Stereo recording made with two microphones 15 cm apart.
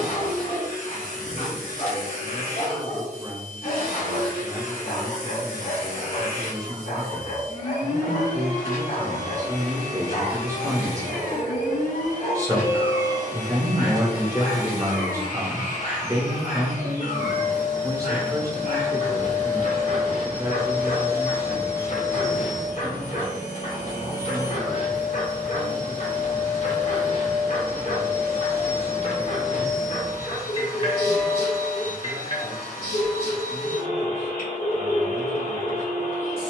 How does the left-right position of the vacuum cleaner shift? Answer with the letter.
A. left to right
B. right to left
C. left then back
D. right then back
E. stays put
E.